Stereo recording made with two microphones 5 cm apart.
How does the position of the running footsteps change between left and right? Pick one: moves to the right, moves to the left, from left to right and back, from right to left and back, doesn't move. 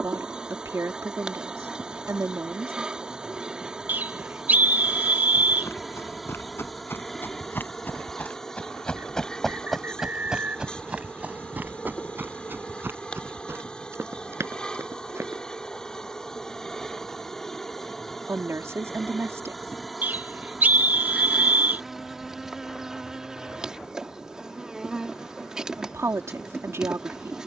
moves to the right.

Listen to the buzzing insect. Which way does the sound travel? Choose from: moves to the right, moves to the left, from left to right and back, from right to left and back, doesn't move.
from right to left and back.